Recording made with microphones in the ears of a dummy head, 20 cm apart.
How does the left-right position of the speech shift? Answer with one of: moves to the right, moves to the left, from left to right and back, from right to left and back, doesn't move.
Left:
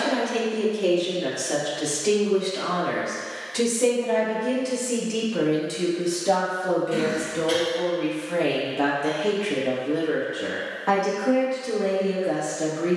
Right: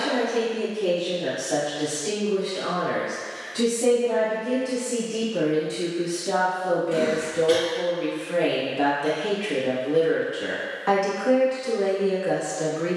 moves to the right.